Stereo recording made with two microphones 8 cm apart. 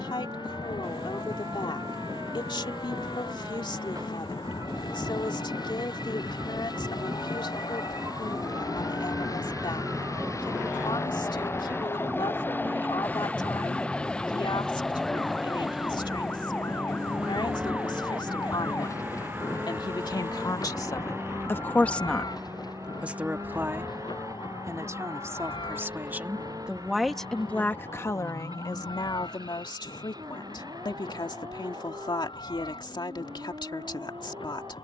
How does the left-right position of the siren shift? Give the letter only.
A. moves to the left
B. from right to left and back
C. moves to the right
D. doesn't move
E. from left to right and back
A.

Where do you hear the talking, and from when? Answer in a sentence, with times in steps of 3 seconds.
You can hear the talking on the left from 0 s, in the centre from 21 s, on the right from 24 s and on the left from 27 s.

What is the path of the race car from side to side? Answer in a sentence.
In this clip you hear the race car move to the right.